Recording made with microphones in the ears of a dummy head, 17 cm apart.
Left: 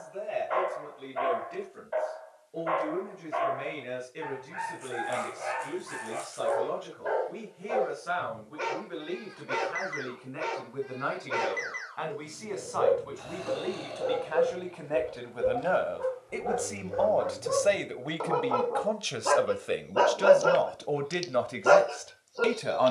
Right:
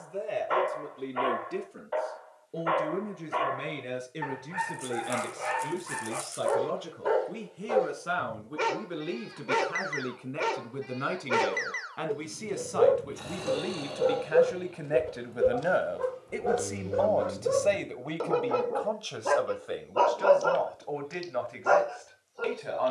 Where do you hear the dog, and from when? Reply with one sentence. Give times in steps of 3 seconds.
You can hear the dog on the right from 0 s, in the centre from 18 s and on the left from 21 s.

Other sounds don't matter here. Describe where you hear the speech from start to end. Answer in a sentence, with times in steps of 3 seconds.
You can hear the speech on the right from 0 s, in the centre from 15 s and on the left from 18 s.